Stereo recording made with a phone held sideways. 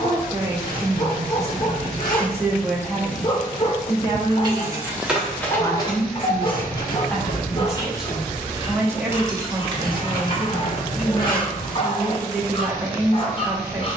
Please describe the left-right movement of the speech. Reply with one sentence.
You can hear the speech go left and come back.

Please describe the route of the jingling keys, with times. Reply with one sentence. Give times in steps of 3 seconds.
You can hear the jingling keys not at all from 0 s, in the centre from 3 s, on the left from 6 s, on the right from 9 s and not at all from 12 s.